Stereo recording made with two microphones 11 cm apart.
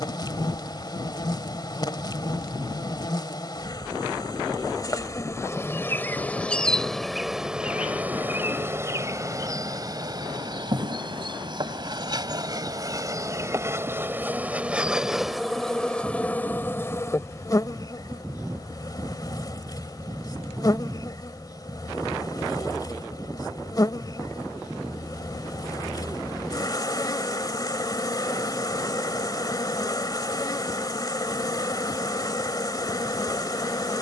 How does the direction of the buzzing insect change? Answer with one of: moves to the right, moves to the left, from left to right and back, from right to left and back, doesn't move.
from left to right and back.